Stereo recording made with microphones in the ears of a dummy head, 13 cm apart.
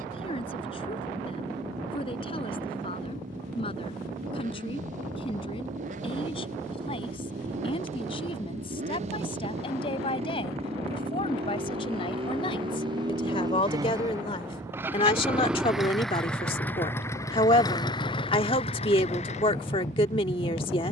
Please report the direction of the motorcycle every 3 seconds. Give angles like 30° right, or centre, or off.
60° right, 60° right, 60° right, 50° right, 30° right, 10° left, 50° left.